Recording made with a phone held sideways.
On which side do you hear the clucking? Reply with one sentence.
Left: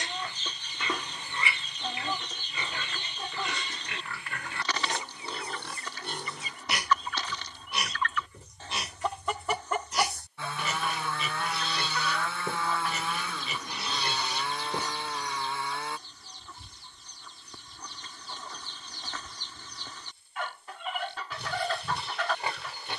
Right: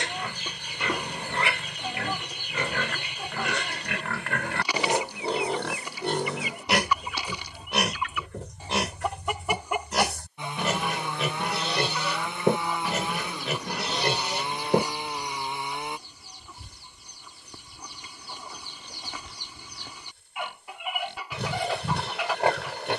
In this clip you hear the clucking in the centre.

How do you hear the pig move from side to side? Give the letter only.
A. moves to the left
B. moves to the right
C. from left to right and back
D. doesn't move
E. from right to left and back
D.